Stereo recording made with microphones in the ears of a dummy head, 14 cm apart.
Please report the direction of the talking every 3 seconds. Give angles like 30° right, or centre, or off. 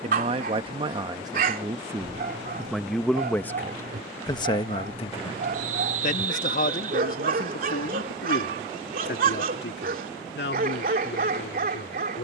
20° right, 20° left, 60° left, 70° left.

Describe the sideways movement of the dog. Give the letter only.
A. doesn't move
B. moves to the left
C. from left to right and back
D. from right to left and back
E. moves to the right
A.